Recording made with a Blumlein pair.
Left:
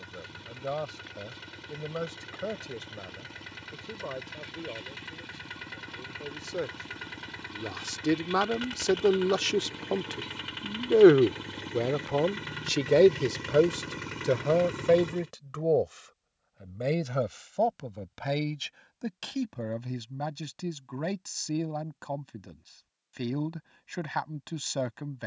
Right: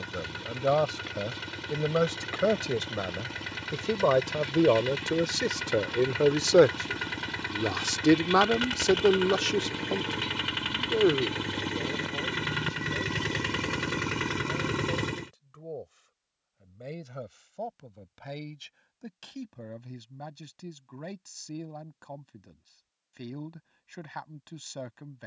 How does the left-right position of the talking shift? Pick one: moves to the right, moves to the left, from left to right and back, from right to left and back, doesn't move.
moves to the left.